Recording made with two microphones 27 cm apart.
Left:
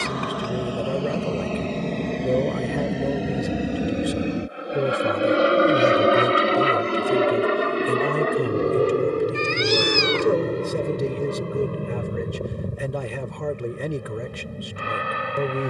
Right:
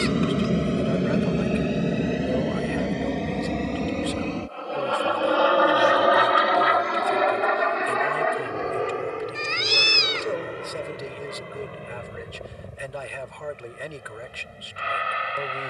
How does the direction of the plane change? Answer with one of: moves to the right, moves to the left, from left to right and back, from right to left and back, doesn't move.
moves to the left.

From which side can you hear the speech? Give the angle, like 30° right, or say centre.
50° left.